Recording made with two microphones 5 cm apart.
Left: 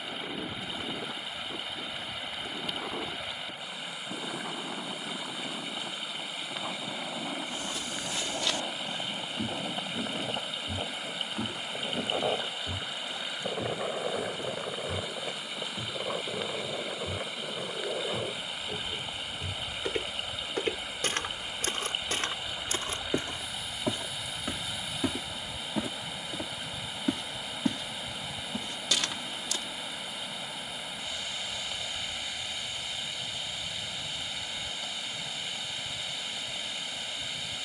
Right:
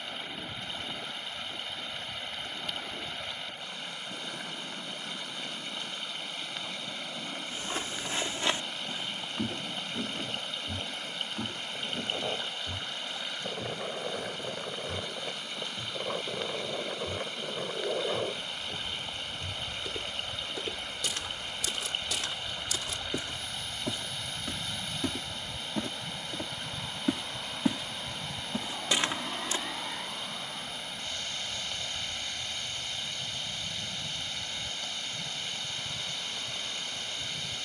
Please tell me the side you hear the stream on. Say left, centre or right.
centre.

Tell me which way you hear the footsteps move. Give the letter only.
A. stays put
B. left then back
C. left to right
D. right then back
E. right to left
B.